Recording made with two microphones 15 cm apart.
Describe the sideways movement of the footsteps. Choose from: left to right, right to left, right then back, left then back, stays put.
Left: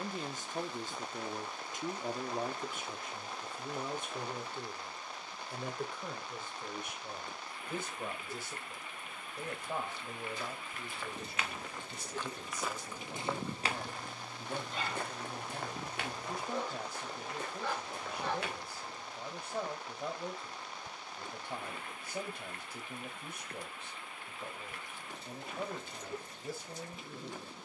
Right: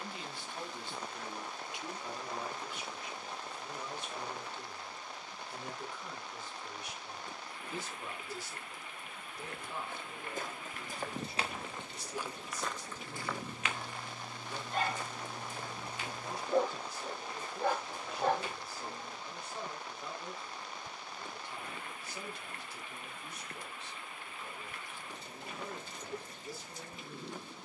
right to left.